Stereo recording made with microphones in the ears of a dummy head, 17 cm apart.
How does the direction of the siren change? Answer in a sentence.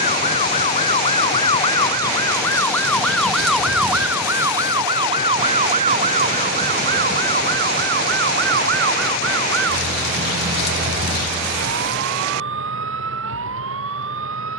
You can hear the siren move from left to right.